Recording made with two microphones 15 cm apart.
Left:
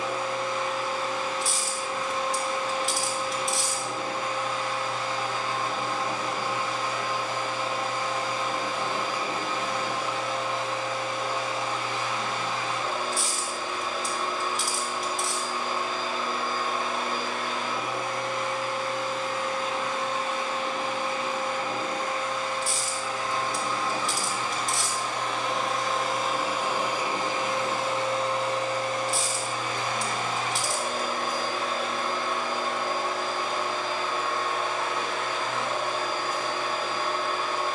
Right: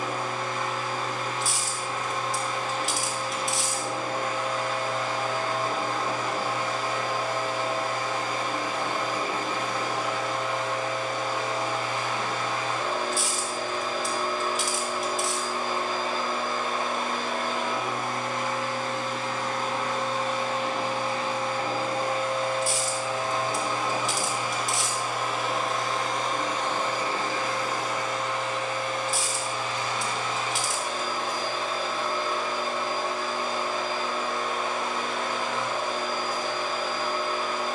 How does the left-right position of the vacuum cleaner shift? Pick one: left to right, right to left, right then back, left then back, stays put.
right to left.